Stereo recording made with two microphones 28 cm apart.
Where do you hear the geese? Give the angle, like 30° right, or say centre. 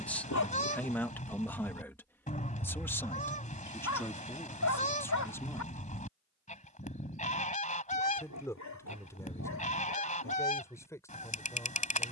30° left.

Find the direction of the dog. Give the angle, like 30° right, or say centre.
80° left.